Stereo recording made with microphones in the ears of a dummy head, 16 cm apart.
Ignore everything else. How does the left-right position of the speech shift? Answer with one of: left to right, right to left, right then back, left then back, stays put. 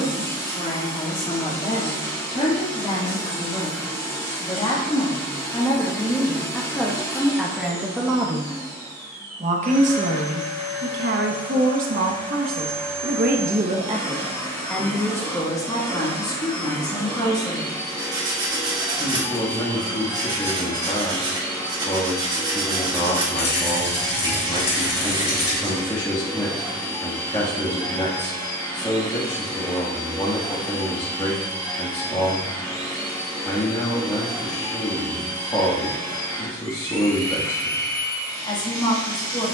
right then back.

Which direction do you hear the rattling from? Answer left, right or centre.
left.